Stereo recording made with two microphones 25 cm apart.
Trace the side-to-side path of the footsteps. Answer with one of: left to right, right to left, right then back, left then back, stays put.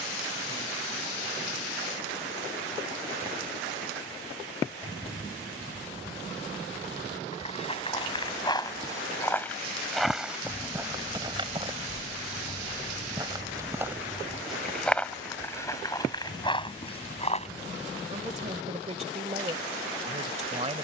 right then back.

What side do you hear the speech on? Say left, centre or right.
right.